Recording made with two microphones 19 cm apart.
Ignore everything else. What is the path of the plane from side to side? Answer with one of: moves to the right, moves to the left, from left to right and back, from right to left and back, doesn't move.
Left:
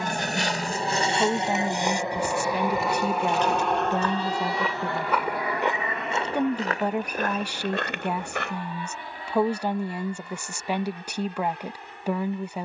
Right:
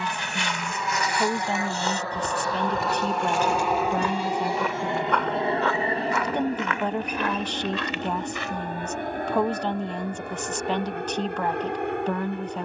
moves to the right.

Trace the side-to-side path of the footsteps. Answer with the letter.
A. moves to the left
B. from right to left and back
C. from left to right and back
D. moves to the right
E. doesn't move
C.